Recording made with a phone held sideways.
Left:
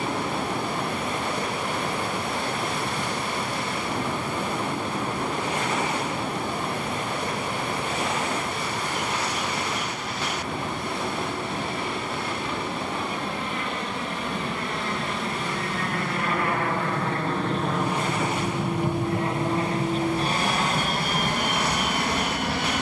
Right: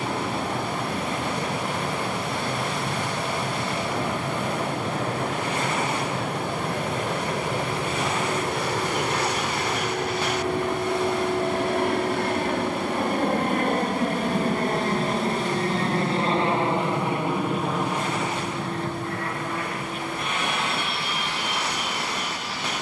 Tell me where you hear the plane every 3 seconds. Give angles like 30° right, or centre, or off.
80° right, 80° right, 70° right, 70° right, 50° right, 20° right, 20° left, 50° left.